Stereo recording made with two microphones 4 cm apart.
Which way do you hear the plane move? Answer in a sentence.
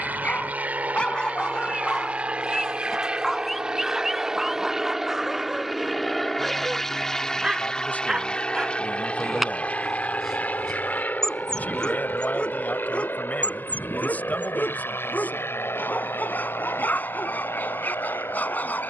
You can hear the plane move to the left.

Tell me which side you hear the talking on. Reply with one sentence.
In this clip you hear the talking on the left.